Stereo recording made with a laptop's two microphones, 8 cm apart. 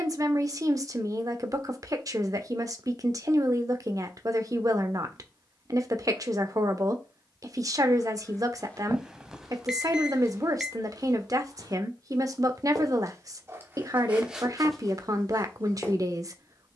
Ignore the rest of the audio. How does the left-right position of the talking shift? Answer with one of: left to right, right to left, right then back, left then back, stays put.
stays put.